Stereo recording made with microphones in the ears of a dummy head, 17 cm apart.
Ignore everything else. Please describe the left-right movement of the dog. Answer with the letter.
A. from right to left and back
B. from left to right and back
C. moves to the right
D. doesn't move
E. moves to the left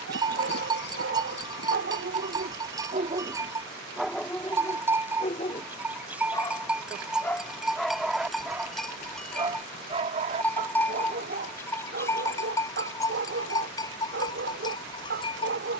A.